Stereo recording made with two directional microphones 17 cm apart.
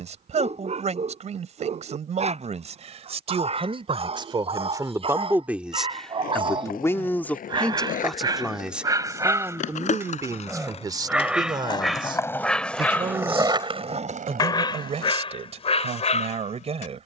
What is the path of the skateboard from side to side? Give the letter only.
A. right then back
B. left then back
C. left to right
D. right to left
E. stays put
C.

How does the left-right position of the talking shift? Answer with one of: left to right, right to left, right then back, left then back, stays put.
left then back.